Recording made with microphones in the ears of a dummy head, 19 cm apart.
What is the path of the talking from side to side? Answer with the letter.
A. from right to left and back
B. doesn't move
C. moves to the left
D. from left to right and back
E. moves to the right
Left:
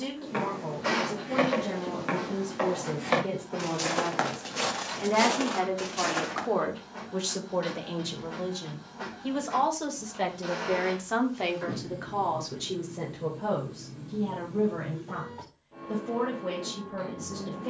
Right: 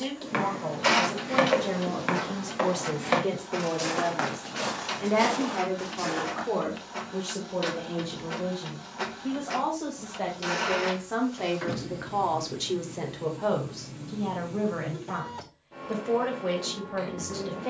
A.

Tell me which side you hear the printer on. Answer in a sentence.
You can hear the printer on the right.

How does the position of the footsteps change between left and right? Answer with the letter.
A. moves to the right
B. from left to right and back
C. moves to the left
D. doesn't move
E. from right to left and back
C.